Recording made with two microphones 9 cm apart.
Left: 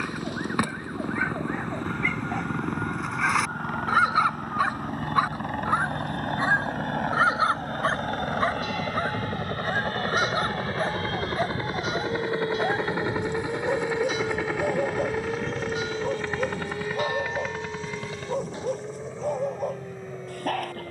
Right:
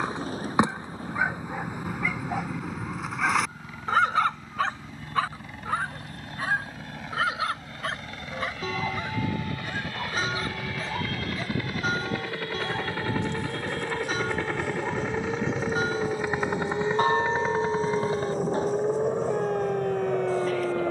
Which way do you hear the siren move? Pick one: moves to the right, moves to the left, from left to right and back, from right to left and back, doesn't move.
moves to the right.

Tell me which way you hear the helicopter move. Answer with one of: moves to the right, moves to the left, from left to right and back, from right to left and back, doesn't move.
moves to the right.